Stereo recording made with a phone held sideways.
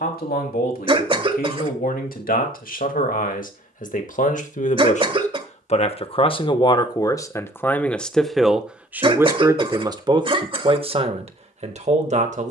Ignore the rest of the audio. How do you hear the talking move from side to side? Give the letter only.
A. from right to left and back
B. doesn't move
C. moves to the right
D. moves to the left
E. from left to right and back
C.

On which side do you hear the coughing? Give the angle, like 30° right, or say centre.
40° right.